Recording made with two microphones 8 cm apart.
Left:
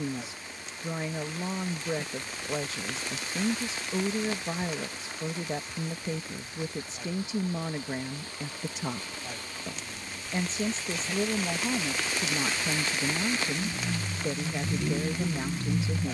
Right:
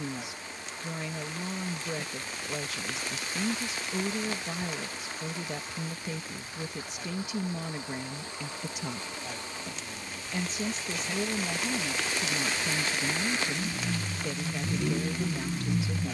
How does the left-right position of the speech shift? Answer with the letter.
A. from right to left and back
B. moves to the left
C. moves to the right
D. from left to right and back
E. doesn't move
E.